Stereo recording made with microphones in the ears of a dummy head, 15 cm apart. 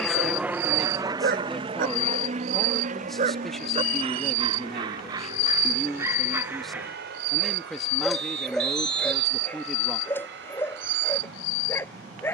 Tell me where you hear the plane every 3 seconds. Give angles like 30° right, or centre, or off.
20° right, 50° right, 60° right, 60° right.